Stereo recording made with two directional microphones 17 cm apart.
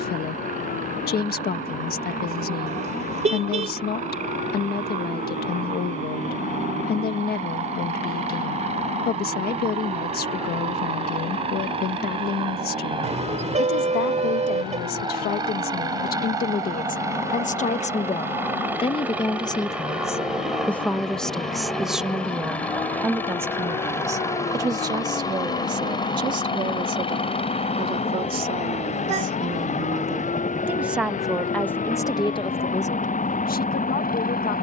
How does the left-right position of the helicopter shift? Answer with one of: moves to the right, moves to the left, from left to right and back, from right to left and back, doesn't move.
moves to the left.